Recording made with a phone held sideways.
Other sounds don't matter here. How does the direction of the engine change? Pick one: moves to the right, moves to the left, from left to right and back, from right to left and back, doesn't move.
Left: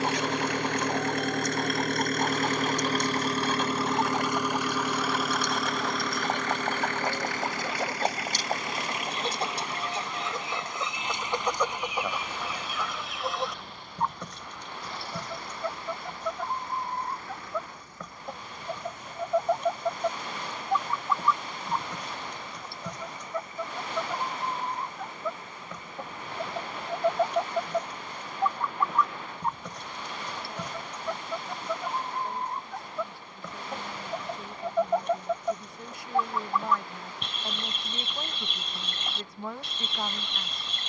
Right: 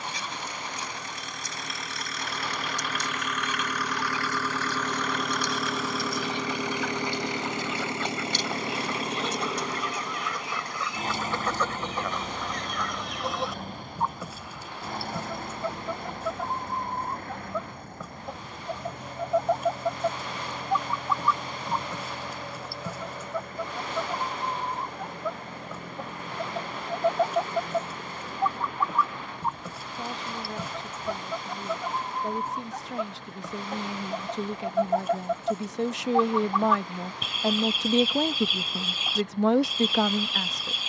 moves to the right.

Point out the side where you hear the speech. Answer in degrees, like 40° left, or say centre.
80° right.